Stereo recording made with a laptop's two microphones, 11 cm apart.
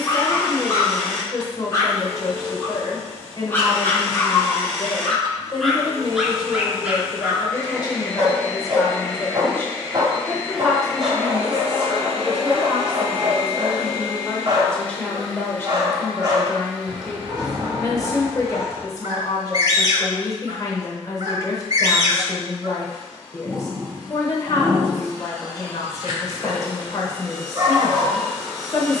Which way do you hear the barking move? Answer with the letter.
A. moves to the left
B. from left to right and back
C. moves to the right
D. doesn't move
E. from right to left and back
C.